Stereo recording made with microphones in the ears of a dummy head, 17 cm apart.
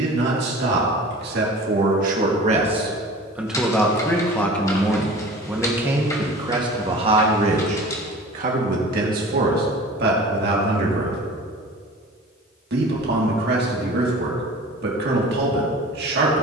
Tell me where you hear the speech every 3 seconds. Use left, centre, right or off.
right, centre, right, right, right, right.